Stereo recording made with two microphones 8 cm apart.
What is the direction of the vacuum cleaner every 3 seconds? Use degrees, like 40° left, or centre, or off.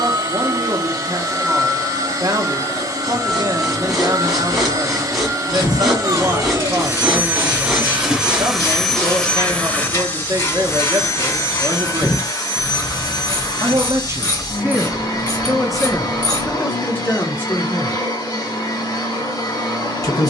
40° right, 40° right, 20° right, 30° left, 50° left, 60° left, 60° left.